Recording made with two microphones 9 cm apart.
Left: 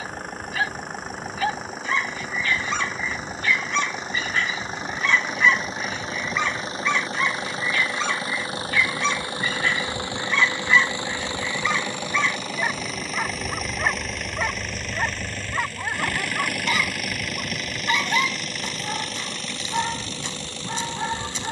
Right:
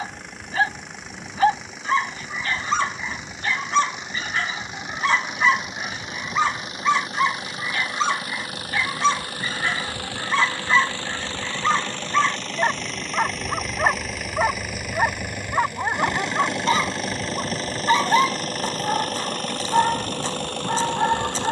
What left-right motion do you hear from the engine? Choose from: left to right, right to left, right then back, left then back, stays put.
left to right.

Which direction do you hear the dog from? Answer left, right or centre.
right.